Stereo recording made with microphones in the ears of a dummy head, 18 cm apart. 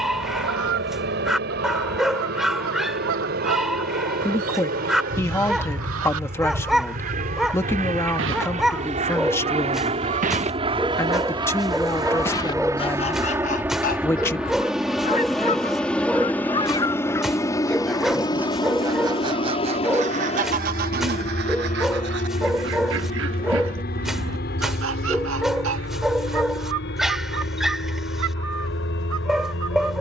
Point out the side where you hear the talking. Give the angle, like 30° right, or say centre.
10° left.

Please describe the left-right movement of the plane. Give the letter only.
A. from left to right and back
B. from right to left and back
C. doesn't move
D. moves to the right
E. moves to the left
E.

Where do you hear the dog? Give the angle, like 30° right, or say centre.
centre.